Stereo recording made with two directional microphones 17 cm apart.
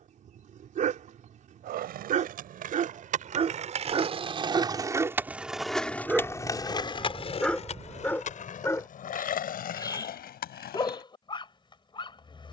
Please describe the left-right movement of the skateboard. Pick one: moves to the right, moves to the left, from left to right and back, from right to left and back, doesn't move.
moves to the left.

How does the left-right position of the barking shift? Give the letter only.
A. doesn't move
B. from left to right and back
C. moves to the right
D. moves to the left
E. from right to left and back
D.